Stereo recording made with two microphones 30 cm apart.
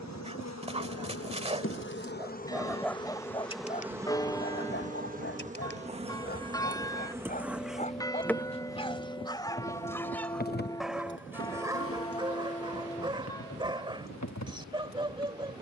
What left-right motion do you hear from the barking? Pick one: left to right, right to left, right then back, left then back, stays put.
left then back.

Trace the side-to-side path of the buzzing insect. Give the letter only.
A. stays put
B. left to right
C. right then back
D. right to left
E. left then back
C.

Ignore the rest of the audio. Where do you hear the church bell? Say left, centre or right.
centre.